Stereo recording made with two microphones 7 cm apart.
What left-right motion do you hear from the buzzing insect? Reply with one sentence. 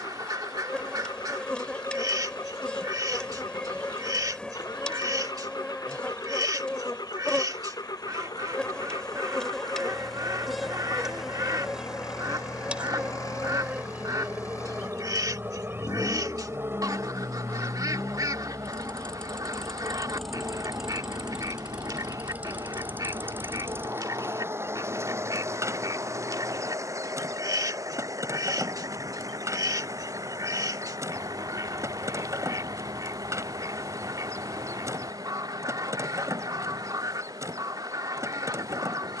In this clip you hear the buzzing insect move from left to right.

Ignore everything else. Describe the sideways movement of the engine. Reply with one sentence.
In this clip you hear the engine move from left to right.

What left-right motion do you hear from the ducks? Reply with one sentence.
In this clip you hear the ducks stay put.